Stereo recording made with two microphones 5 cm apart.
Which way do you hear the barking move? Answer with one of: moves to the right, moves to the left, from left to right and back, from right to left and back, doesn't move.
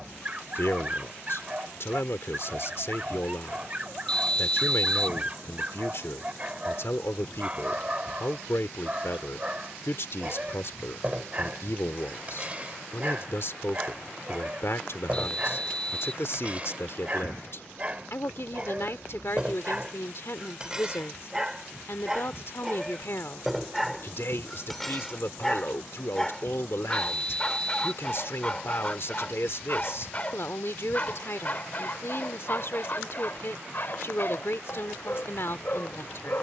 moves to the left.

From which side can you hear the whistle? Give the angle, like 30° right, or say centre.
20° left.